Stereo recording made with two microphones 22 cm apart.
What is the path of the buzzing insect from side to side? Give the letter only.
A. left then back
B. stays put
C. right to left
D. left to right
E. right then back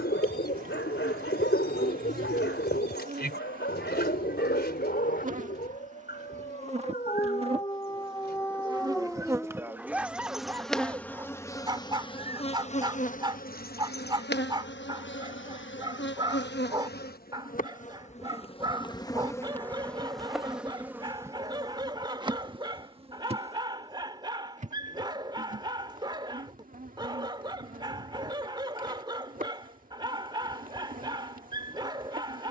A.